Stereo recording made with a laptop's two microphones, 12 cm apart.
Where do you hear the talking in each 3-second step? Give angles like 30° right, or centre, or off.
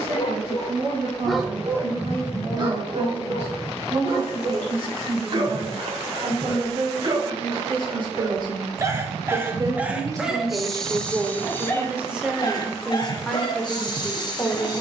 60° right, 50° right, 40° right, 20° right, 10° left.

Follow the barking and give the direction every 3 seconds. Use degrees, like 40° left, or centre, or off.
centre, 50° right, 40° right, centre, 40° left.